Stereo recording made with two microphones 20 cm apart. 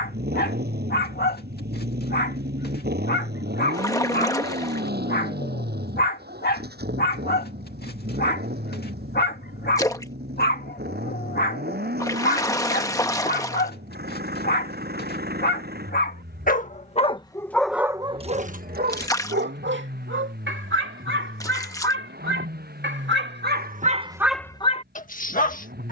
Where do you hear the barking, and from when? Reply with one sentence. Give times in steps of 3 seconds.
You can hear the barking on the left from 0 s, on the right from 18 s and on the left from 24 s.